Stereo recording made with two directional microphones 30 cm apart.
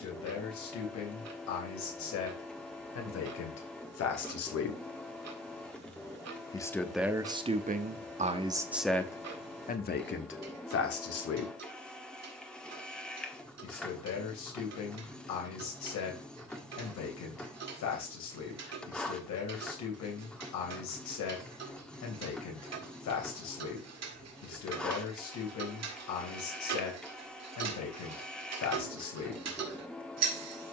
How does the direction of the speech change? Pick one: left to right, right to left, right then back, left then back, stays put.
right then back.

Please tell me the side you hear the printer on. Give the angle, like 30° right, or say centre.
centre.